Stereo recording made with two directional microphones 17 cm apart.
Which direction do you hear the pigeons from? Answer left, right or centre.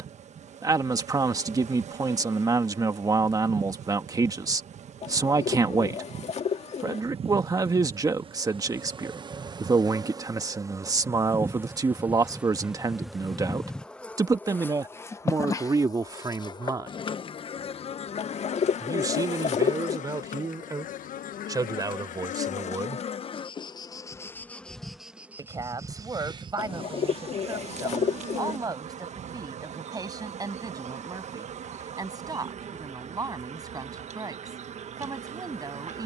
left.